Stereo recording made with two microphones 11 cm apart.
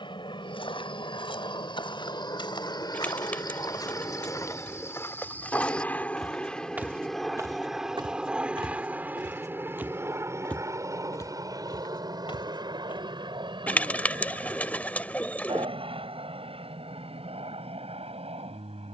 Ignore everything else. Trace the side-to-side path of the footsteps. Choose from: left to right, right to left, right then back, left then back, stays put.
right then back.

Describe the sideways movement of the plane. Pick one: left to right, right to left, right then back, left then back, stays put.
left to right.